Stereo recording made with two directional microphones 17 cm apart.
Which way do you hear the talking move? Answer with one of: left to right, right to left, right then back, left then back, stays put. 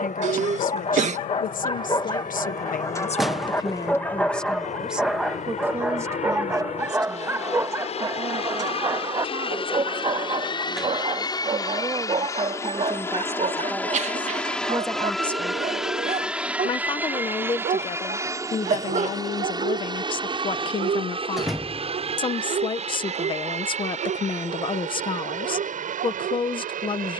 right then back.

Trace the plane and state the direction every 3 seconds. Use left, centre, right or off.
left, left, left, left, centre, centre, right, right, right.